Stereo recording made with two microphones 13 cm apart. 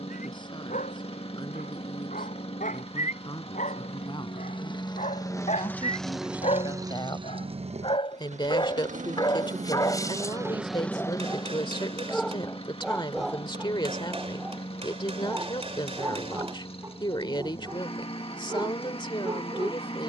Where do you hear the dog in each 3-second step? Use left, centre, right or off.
left, left, left, left, centre, right, right.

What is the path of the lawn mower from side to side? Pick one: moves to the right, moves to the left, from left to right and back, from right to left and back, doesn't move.
from left to right and back.